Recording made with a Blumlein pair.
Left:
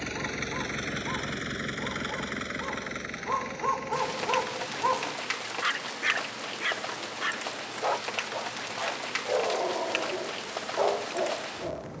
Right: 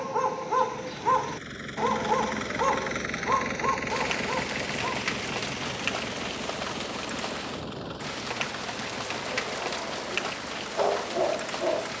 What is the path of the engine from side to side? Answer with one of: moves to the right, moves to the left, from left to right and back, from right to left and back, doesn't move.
moves to the right.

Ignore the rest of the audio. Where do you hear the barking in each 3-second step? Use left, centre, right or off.
right, centre, left, centre.